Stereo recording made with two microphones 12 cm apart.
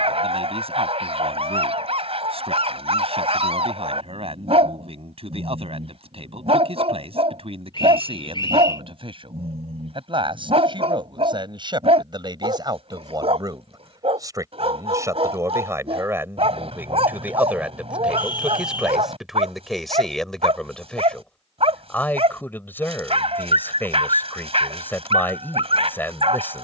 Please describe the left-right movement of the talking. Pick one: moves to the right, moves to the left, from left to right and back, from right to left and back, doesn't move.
moves to the left.